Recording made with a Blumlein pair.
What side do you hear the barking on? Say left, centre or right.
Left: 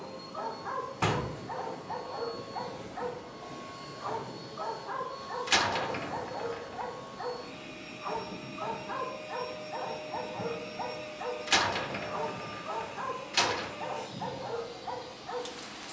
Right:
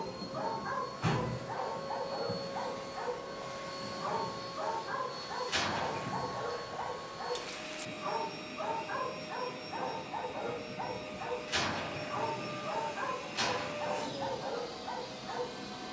centre.